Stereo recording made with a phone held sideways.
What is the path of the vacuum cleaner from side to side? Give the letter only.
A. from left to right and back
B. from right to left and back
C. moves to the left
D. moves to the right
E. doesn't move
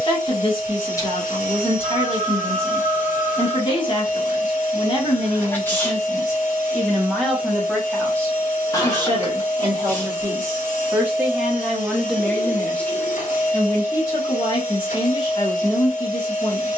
E.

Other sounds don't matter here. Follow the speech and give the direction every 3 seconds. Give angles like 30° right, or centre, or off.
40° left, 30° left, centre, 20° right, 20° left, 30° left.